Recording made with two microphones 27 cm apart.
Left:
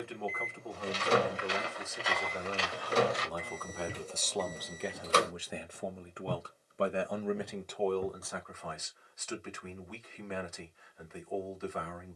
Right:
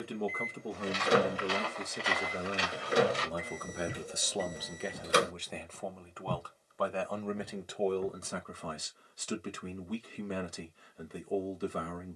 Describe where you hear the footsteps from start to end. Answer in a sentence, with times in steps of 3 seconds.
In this clip you hear the footsteps in the centre from 0 s, on the right from 3 s, on the left from 6 s and not at all from 9 s.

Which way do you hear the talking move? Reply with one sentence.
You can hear the talking move from right to left and back again.